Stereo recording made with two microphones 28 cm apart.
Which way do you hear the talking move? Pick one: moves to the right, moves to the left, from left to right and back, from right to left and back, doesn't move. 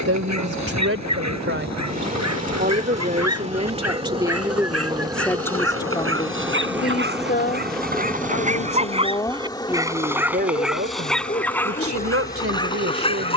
from right to left and back.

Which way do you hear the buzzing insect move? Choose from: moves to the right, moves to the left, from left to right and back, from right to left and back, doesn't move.
moves to the left.